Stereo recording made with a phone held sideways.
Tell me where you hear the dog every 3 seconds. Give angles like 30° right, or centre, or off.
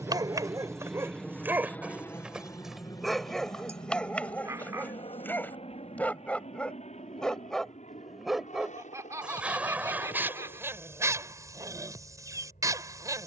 20° right, 10° left, centre, 20° right, 30° right.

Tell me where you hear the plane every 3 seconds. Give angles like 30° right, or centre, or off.
10° left, 40° left, 50° left, 60° left, 60° left.